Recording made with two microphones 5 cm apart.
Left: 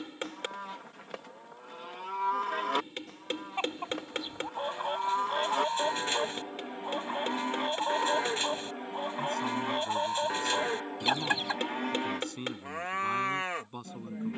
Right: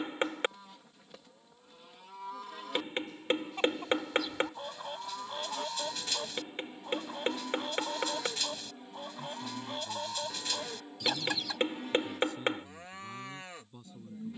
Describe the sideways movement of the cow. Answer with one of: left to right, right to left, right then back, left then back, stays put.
stays put.